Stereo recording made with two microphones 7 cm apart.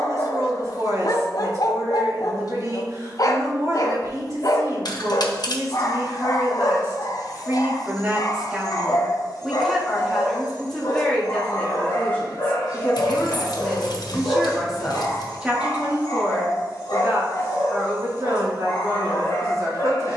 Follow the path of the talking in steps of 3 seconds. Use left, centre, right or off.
right, right, right, centre, centre, right, right.